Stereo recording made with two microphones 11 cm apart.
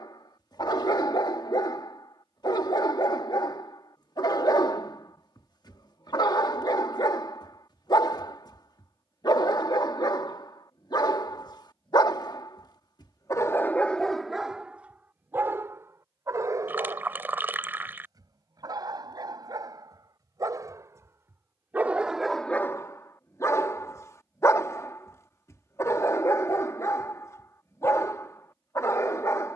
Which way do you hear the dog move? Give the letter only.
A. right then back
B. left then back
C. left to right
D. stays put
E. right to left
A.